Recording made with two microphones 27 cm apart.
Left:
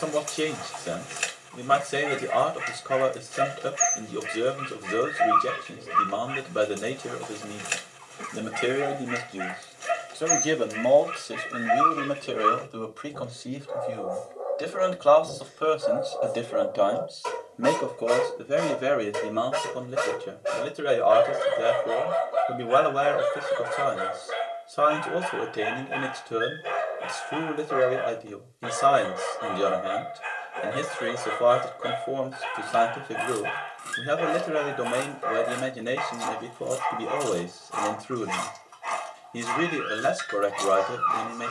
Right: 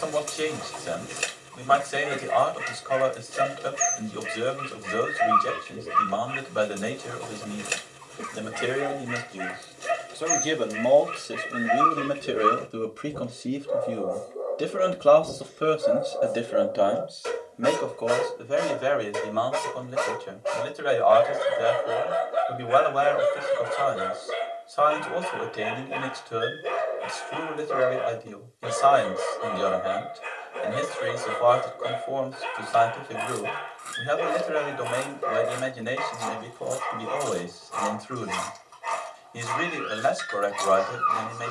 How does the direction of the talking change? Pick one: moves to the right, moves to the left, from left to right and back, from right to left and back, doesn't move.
from left to right and back.